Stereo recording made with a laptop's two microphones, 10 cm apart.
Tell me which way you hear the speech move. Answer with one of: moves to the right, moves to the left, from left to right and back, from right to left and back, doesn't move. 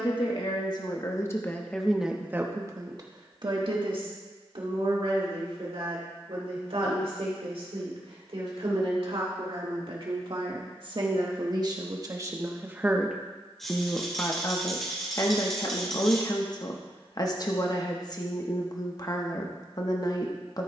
from left to right and back.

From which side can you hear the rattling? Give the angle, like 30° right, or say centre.
centre.